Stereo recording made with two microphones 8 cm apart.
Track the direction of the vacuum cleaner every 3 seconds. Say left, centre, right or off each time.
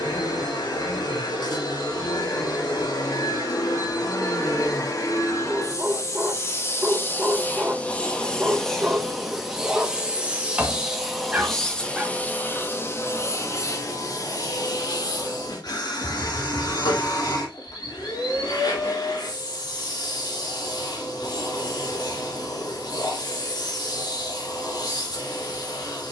left, left, left, centre, left, left, left, left, left.